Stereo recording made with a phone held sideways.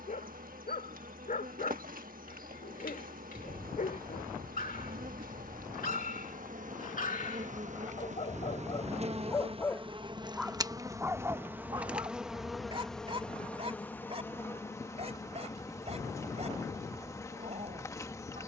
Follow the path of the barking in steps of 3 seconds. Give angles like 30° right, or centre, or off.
80° left, 80° left, 60° left, 10° right, 40° right, 50° right.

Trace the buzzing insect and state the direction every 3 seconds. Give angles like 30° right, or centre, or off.
80° right, 80° right, 60° right, 30° right, 10° left, 20° left.